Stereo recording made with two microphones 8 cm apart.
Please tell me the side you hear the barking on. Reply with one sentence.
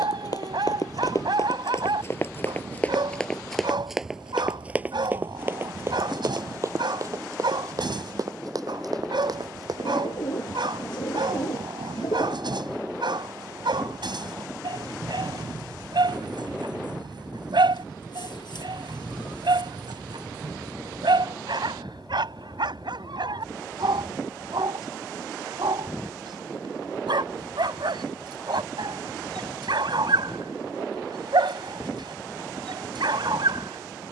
In this clip you hear the barking on the right.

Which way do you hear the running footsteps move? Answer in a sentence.
You can hear the running footsteps move from left to right.